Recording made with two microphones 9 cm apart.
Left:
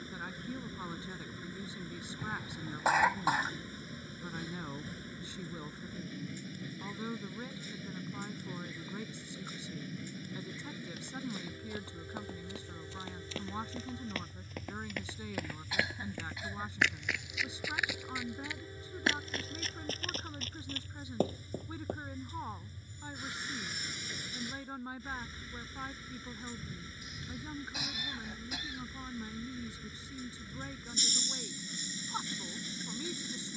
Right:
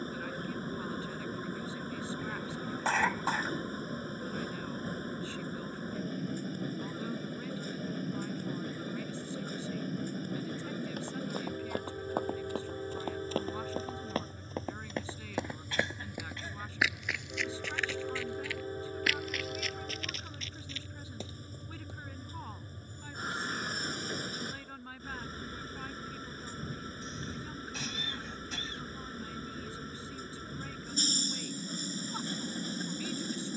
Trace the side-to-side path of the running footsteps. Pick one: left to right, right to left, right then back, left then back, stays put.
right to left.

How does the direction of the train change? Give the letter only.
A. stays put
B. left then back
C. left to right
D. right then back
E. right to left
A.